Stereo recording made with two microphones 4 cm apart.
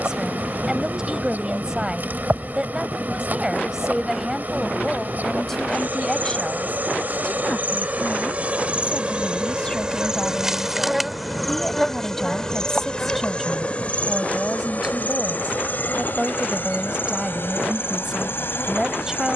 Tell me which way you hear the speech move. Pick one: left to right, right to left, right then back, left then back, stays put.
left then back.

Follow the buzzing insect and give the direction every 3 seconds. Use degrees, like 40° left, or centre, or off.
40° right, 40° right, 40° right, 10° right, 30° left, 50° left, 60° left.